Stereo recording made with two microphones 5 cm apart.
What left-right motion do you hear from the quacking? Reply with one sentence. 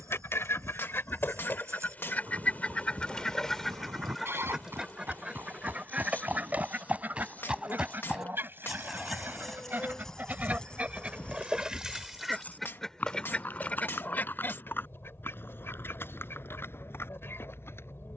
You can hear the quacking go right and come back.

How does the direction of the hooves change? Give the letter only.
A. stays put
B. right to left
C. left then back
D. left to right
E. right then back
B.